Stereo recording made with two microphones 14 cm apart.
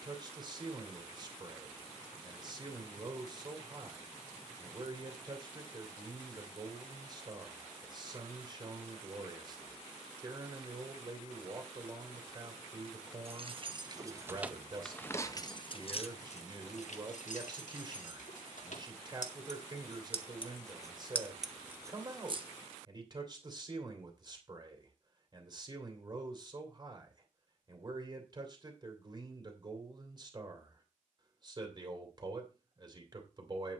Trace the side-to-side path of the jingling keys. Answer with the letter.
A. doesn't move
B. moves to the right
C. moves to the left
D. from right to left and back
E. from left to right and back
D.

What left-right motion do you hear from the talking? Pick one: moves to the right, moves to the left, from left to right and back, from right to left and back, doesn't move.
doesn't move.